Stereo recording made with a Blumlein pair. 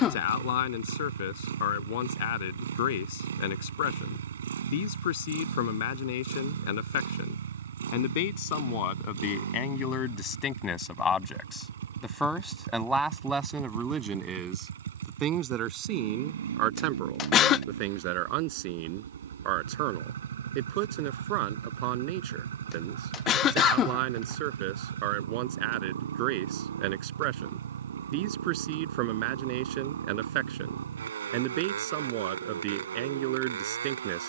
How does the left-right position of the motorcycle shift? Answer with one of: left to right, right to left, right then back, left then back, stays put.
stays put.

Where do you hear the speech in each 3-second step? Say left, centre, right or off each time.
left, left, left, left, centre, right, right, right, right, right, right, right.